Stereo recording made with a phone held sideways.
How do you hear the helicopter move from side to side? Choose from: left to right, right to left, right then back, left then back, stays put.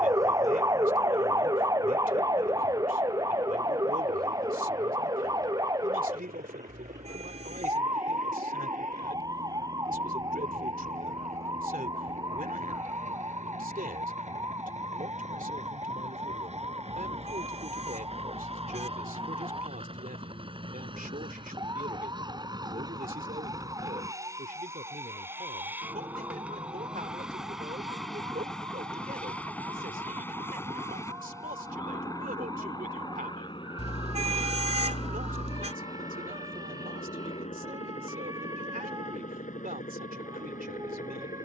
right to left.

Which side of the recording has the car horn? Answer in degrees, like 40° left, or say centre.
40° right.